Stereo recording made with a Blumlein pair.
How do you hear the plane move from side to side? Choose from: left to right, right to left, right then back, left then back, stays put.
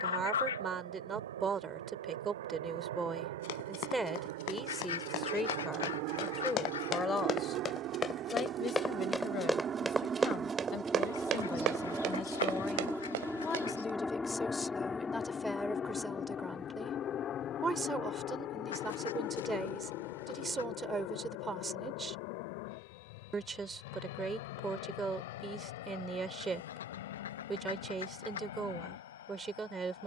right to left.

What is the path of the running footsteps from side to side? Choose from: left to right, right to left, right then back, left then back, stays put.
left to right.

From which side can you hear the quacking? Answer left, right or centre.
left.